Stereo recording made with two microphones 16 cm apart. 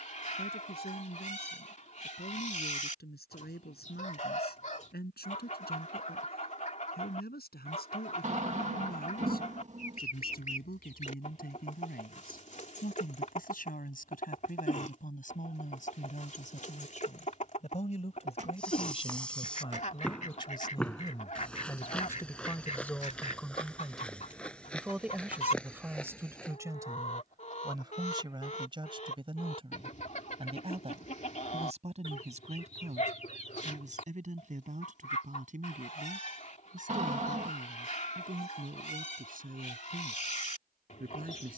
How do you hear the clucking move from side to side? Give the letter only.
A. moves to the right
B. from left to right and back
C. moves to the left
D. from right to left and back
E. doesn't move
E.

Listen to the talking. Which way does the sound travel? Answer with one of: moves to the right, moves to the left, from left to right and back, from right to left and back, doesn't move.
moves to the right.